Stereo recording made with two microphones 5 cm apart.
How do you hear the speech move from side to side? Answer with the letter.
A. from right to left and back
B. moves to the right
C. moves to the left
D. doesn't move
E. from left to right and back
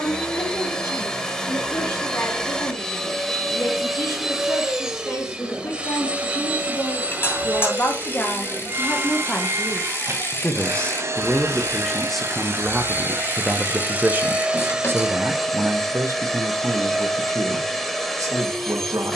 B.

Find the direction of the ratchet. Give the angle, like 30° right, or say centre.
40° left.